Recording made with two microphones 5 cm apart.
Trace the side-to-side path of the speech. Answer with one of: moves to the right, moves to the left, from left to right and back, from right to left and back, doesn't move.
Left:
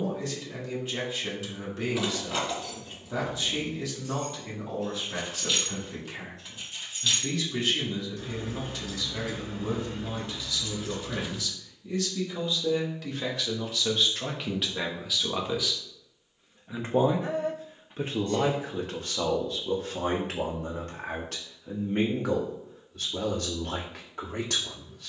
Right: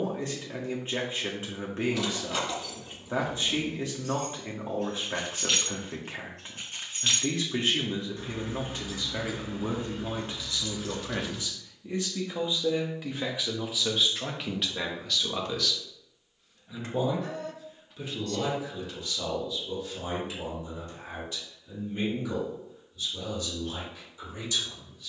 moves to the left.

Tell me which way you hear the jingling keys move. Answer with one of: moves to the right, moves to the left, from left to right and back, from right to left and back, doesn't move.
from left to right and back.